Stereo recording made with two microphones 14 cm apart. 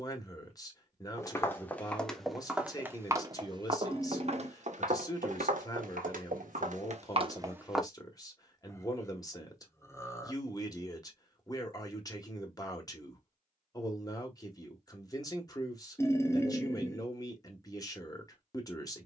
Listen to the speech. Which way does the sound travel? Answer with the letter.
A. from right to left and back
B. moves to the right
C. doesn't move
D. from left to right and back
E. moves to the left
C.